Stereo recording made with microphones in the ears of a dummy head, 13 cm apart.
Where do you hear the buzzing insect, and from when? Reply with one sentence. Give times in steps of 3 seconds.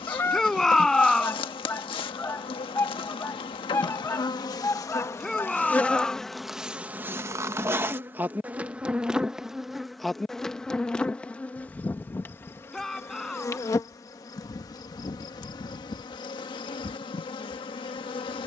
You can hear the buzzing insect on the left from 0 s, in the centre from 6 s and on the left from 12 s.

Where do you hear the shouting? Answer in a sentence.
You can hear the shouting in the centre.